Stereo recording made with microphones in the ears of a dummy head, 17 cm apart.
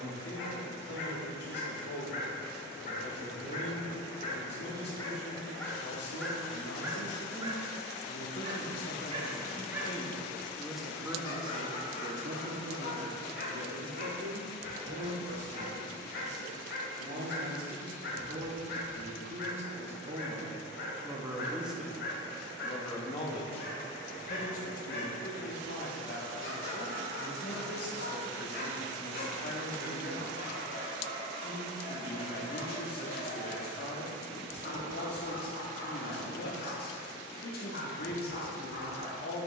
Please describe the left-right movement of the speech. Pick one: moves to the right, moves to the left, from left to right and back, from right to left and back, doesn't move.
from left to right and back.